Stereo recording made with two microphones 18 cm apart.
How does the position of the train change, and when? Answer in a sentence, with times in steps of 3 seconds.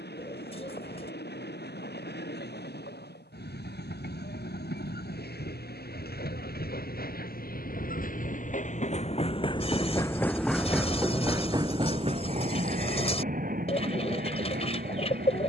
In this clip you hear the train on the left from 0 s, in the centre from 9 s and on the right from 12 s.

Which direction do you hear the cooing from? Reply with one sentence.
You can hear the cooing on the left.